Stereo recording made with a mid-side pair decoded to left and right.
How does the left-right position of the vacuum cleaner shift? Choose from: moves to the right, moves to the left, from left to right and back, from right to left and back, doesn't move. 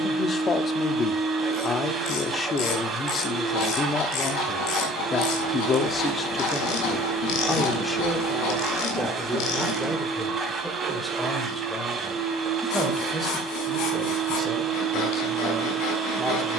doesn't move.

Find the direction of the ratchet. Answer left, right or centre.
left.